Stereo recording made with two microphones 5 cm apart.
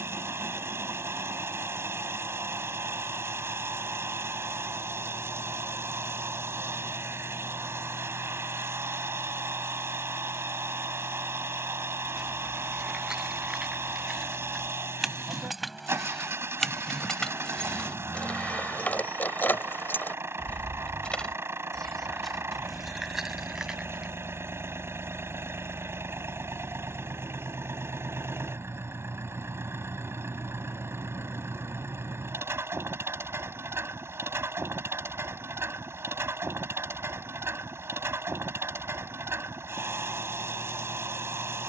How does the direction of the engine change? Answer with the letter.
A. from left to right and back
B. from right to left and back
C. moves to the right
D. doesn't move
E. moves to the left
D.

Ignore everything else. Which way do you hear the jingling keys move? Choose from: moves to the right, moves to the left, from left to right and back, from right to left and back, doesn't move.
from right to left and back.